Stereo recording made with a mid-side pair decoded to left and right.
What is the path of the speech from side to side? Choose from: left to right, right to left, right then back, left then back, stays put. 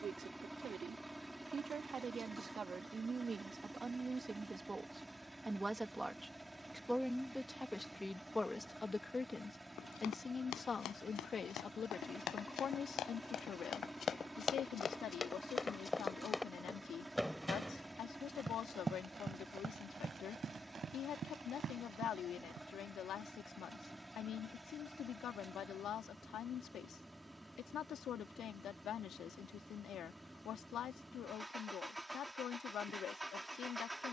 right to left.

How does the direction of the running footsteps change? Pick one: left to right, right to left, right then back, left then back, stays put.
left to right.